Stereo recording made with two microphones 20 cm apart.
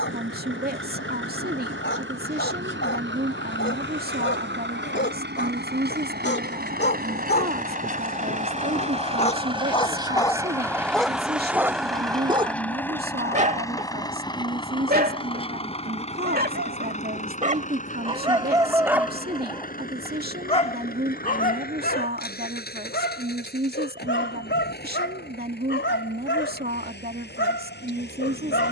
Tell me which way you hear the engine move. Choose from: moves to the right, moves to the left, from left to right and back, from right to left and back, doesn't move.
moves to the left.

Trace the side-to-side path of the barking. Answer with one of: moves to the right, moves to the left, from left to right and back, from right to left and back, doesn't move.
from left to right and back.